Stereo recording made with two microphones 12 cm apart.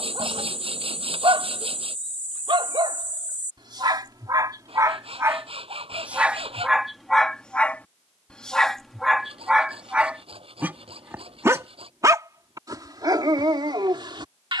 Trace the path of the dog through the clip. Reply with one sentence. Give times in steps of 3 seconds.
In this clip you hear the dog on the right from 0 s, in the centre from 6 s and on the right from 12 s.